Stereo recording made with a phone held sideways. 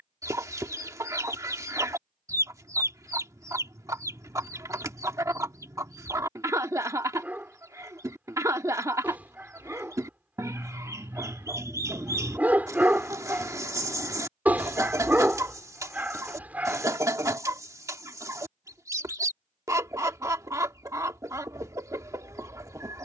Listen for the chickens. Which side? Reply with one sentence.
You can hear the chickens on the right.